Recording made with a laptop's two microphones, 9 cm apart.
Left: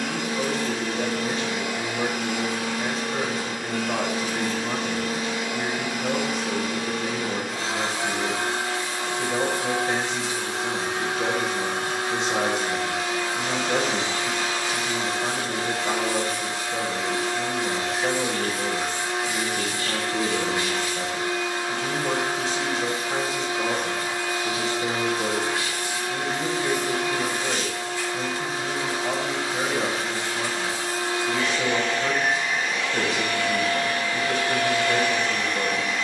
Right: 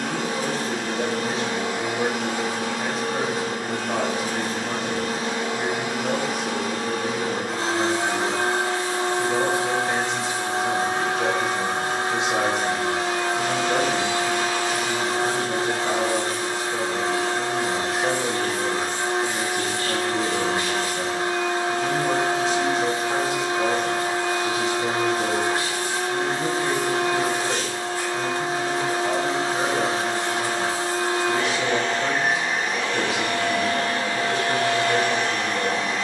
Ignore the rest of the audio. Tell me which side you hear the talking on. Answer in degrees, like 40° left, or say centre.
centre.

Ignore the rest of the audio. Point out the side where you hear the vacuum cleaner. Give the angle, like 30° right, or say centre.
40° right.